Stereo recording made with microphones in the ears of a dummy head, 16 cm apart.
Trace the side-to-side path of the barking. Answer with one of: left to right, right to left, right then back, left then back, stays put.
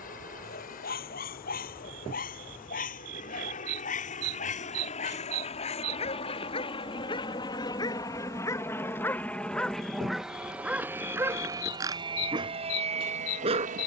left to right.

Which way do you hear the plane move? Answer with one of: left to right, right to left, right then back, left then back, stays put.
left to right.